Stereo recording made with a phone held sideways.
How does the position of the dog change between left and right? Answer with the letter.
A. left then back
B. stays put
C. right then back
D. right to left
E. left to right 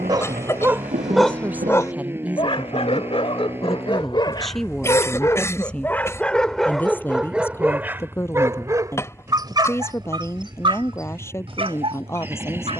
A.